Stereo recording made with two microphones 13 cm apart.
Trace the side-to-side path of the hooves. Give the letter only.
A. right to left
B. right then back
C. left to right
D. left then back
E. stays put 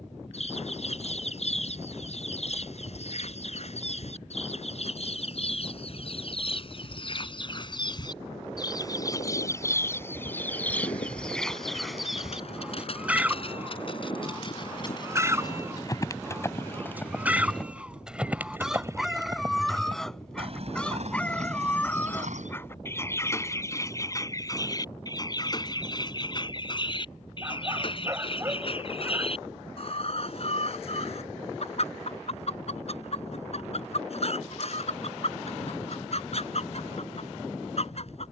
C.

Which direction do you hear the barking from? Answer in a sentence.
In this clip you hear the barking on the right.